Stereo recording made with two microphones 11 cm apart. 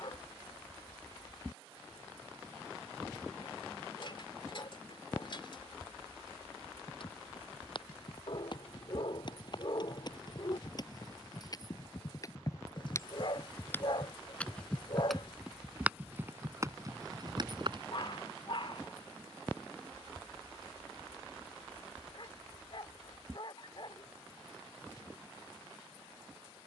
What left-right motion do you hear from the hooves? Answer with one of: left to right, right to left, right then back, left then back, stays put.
left to right.